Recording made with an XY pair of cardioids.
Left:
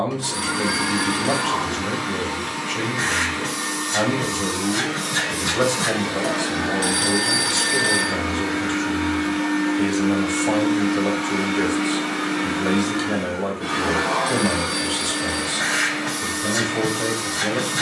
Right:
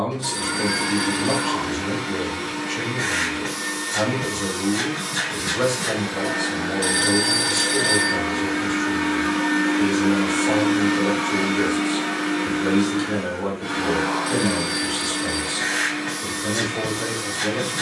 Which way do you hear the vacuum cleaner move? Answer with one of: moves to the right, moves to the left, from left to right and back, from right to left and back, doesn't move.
from left to right and back.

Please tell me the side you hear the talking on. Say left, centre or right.
left.